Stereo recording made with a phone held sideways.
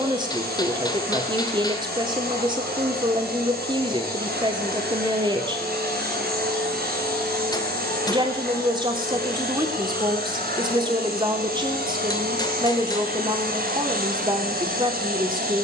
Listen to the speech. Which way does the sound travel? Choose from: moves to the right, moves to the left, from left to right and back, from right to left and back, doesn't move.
doesn't move.